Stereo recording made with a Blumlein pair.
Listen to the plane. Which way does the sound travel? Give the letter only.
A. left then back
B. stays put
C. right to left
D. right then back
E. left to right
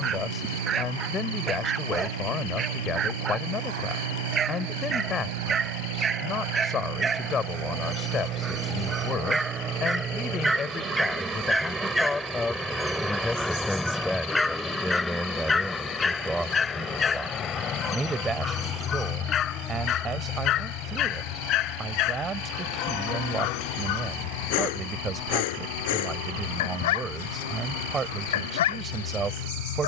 C.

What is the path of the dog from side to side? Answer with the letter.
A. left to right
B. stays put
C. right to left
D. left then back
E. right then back
C.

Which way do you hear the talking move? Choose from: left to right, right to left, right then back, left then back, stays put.
left to right.